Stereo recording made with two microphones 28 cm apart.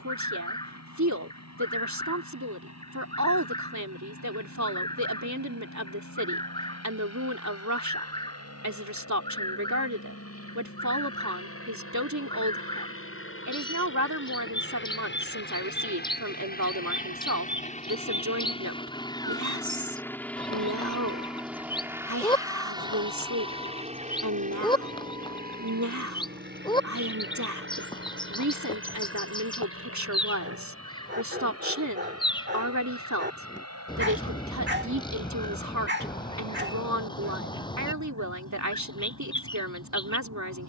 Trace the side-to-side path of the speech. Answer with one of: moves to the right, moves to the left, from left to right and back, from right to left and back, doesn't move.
doesn't move.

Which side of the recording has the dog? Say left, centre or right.
right.